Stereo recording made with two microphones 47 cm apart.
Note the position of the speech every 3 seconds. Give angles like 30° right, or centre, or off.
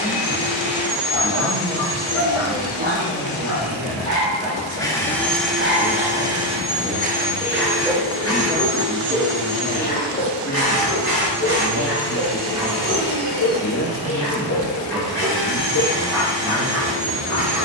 40° right, 40° right, 20° right, 30° left, 30° left, 30° right.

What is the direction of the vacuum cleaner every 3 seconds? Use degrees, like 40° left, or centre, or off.
40° left, 10° left, 20° right, 50° right, 60° right, 70° right.